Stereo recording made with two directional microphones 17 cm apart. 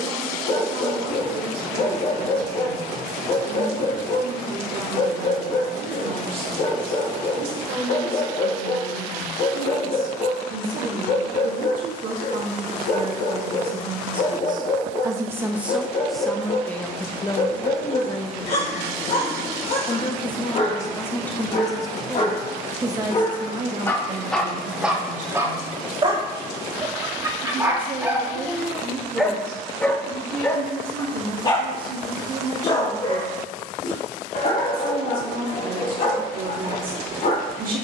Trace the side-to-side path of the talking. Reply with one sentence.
You can hear the talking move from right to left and back again.